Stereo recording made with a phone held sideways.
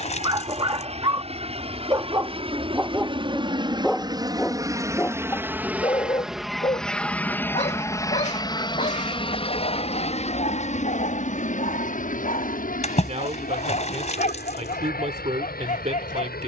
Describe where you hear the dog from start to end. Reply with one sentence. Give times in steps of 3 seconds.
You can hear the dog on the right from 0 s, in the centre from 3 s and on the left from 6 s.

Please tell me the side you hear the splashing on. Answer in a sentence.
You can hear the splashing on the left.